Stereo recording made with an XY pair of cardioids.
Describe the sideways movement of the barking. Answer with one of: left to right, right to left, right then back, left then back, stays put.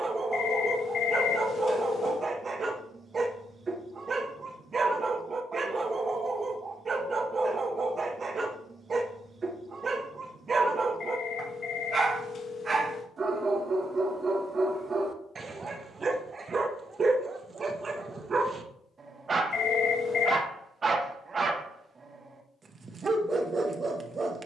stays put.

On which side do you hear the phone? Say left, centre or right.
left.